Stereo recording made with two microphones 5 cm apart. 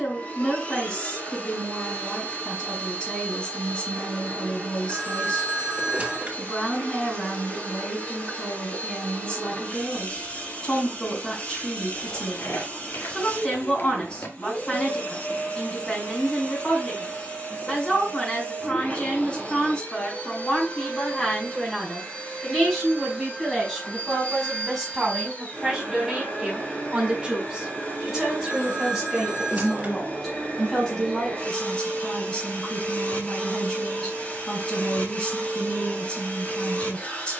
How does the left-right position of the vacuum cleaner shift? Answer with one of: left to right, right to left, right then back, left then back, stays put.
stays put.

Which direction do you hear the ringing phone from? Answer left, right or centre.
right.